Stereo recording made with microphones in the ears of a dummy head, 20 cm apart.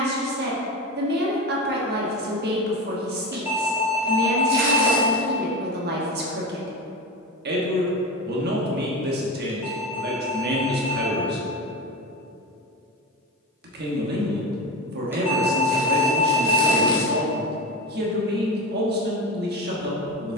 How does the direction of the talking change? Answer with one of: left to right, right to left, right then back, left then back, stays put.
stays put.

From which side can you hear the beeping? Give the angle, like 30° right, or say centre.
10° right.